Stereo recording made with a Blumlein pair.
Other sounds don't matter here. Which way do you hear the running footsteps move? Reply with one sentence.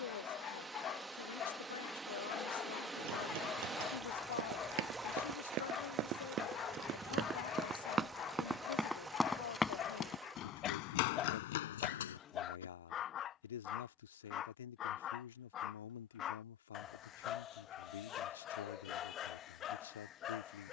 In this clip you hear the running footsteps go from the right side to the left.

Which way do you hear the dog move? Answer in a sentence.
You can hear the dog stay put.